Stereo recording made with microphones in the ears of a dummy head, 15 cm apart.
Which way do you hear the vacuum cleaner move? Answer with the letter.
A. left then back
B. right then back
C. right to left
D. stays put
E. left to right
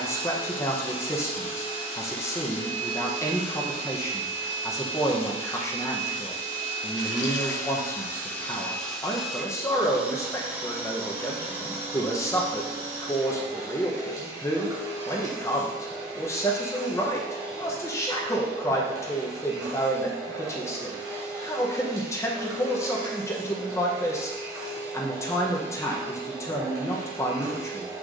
E.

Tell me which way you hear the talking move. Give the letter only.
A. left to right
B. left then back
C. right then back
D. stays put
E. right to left
D.